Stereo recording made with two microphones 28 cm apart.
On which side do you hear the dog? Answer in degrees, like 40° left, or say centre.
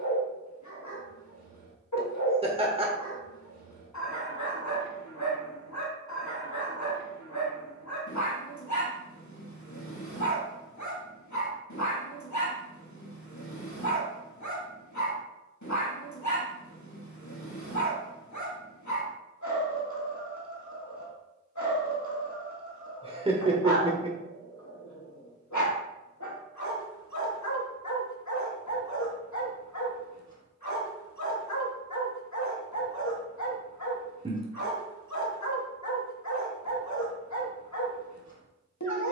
90° left.